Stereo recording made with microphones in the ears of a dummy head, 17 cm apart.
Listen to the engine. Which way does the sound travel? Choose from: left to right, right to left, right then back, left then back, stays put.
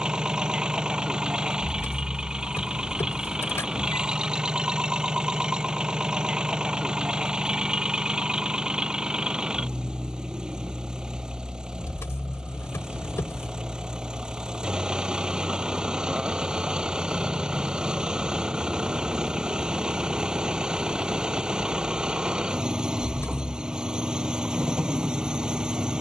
stays put.